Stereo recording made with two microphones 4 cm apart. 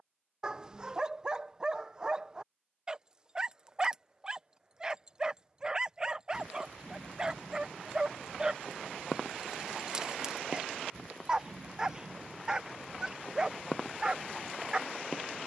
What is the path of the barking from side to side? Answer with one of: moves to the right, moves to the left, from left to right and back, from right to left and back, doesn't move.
doesn't move.